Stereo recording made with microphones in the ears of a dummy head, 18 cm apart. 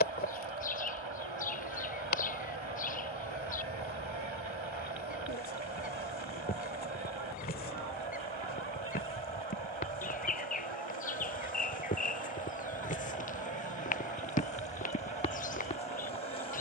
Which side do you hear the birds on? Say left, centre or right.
left.